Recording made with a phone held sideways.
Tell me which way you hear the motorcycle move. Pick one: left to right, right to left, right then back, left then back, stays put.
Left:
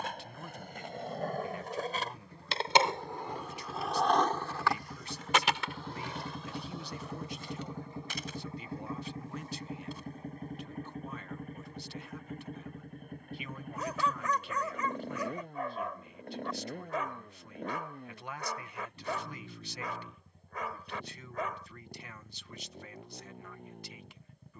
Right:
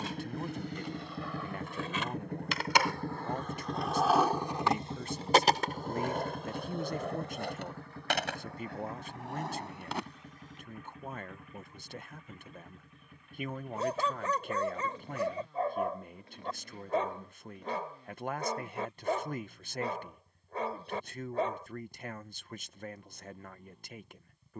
right to left.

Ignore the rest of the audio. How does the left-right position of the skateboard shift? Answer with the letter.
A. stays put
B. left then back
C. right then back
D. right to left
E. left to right
E.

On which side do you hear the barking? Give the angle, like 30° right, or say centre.
30° right.